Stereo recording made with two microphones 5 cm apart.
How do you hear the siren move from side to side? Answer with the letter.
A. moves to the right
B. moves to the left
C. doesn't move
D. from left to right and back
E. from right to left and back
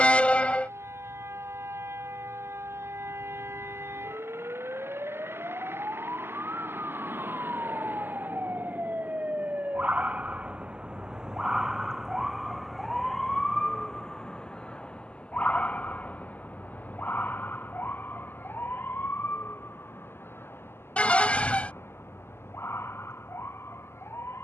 B.